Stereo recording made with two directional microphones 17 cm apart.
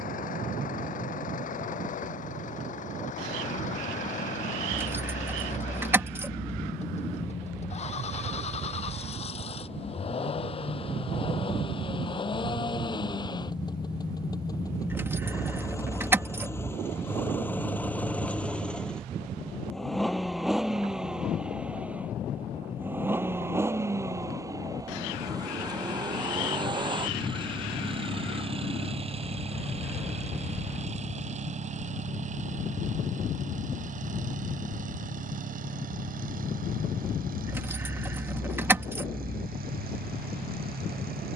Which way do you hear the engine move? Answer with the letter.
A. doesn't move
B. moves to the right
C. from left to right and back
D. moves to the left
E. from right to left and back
B.